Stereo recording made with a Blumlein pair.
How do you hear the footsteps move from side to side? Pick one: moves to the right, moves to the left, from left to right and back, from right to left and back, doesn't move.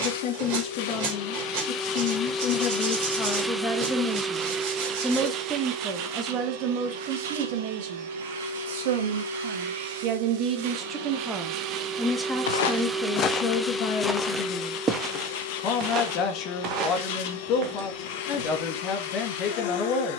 moves to the right.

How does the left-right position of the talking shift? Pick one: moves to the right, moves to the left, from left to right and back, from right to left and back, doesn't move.
from left to right and back.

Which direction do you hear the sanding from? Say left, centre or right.
right.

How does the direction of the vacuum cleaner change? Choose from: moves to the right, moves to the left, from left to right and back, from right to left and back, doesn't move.
from left to right and back.